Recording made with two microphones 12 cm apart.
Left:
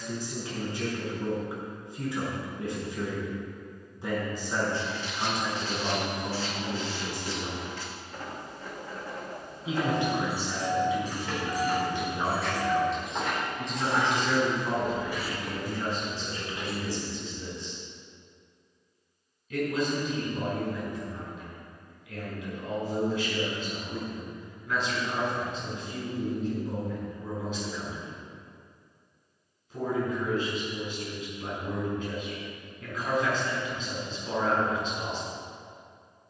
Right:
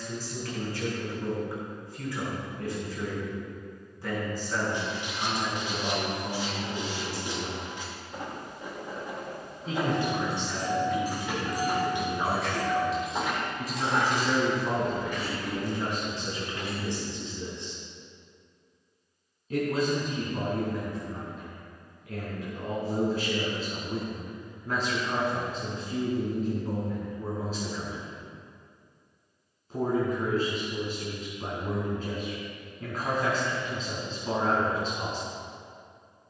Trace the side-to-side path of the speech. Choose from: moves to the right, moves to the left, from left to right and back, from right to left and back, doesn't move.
moves to the right.